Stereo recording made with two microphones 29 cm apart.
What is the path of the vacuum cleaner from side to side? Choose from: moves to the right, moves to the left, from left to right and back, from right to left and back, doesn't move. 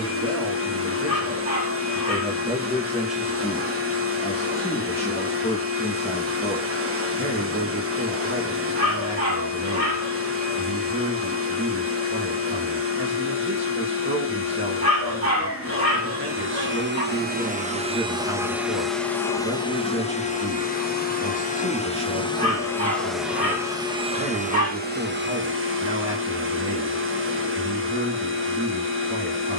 from right to left and back.